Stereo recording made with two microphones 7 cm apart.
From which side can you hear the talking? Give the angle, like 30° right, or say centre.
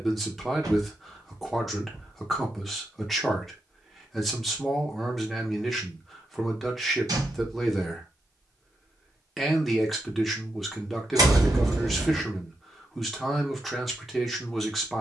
centre.